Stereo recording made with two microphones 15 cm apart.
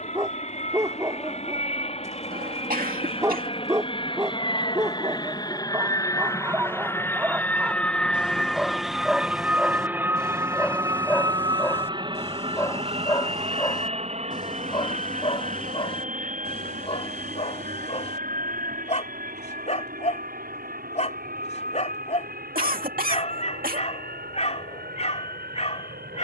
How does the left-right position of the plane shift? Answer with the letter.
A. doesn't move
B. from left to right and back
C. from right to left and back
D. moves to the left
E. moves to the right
E.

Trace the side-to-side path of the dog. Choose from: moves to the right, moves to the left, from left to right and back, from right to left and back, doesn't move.
moves to the left.